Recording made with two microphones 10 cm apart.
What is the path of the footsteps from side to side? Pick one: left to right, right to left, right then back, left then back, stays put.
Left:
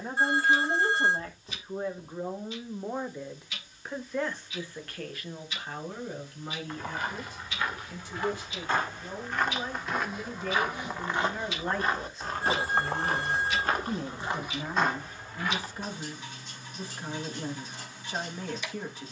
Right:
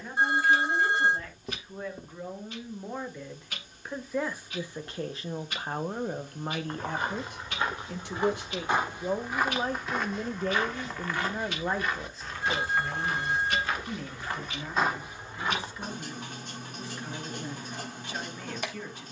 left then back.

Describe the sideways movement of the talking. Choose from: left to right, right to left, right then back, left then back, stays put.
right then back.